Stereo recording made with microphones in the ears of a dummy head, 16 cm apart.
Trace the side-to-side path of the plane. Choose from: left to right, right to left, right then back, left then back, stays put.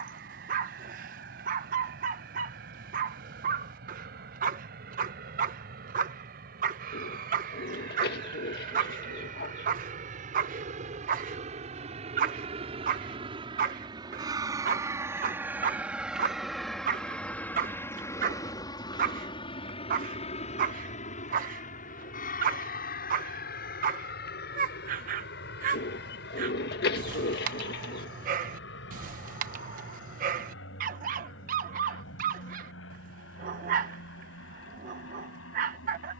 right to left.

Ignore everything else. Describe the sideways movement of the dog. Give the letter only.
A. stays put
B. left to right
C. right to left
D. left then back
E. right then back
A.